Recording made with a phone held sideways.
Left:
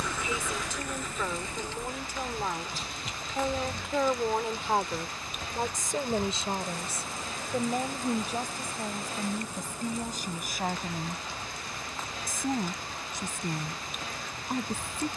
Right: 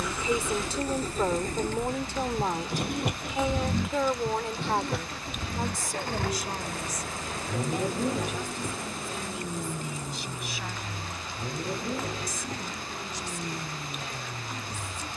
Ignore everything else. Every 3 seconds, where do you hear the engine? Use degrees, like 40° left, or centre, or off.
40° right, 60° right, 70° right, 70° right, 80° right.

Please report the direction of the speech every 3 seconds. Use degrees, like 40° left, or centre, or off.
30° right, 10° left, 30° left, 50° left, 50° left.